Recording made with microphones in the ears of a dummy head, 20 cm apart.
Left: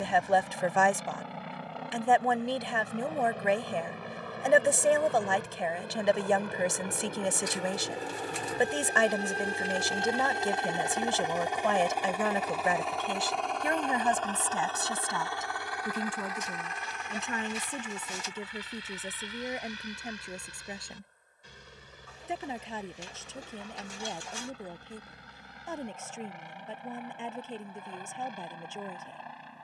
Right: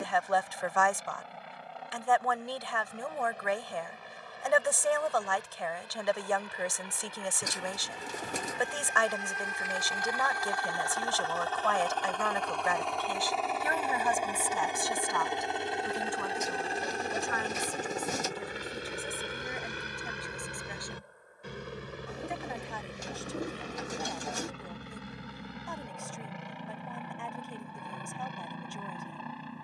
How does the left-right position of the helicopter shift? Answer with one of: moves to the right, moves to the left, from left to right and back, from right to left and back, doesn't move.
moves to the right.